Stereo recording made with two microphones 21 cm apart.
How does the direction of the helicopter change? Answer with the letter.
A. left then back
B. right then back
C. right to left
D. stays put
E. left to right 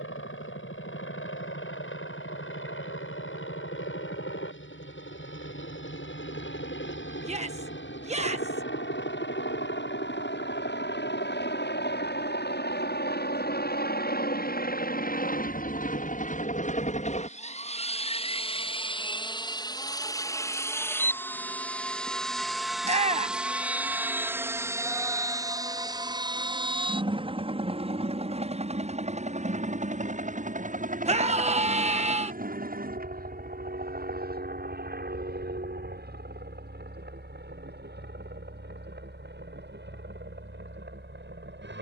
E.